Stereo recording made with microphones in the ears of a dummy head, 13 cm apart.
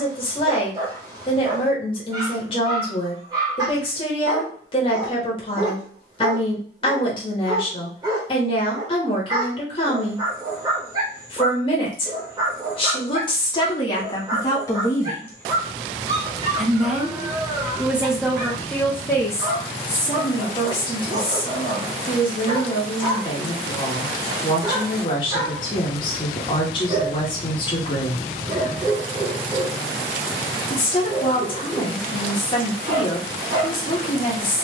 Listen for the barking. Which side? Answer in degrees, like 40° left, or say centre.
30° right.